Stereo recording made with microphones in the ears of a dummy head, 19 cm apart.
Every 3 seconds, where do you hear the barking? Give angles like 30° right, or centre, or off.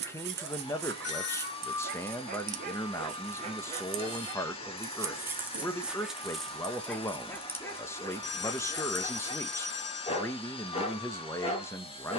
50° right, 20° right, 10° left, 30° left.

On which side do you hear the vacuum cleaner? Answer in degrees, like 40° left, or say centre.
30° left.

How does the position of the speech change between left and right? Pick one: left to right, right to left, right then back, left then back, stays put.
stays put.